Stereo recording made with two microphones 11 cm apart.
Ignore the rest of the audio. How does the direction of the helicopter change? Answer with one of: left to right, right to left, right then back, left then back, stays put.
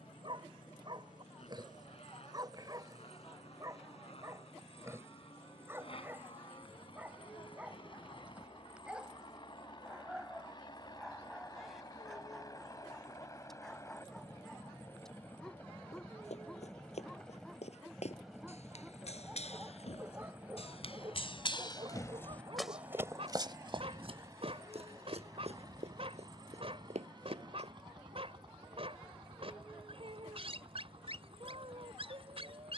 left to right.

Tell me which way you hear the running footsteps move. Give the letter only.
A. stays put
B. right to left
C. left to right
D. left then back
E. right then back
C.